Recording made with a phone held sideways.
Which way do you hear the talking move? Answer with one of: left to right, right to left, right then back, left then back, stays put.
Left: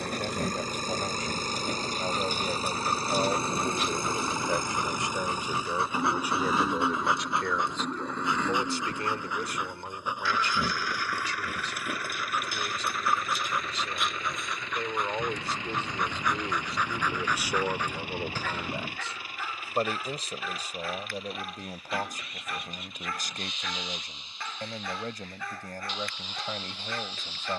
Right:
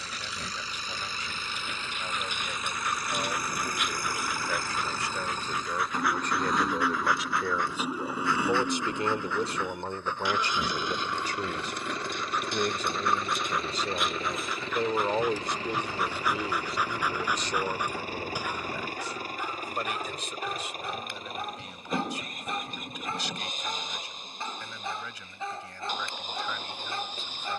right then back.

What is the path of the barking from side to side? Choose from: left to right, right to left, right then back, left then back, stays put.
left to right.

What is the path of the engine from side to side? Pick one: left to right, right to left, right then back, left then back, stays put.
left to right.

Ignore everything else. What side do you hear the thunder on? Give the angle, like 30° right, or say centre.
20° left.